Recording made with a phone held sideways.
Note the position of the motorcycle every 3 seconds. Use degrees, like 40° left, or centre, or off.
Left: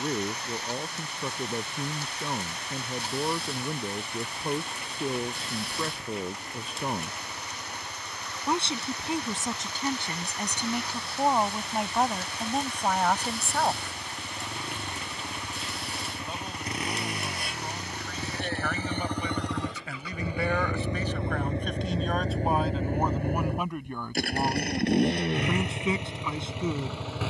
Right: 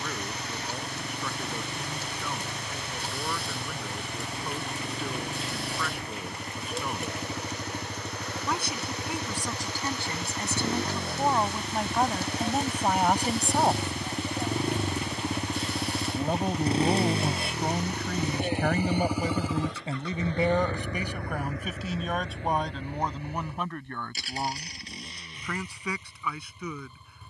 60° right, 60° right, 60° right, 50° right, 40° right, 30° right, centre, 40° left, 70° left.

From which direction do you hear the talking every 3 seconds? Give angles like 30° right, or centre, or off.
30° left, 30° left, 30° left, 20° left, 10° right, 60° right, 30° right, centre, 20° left.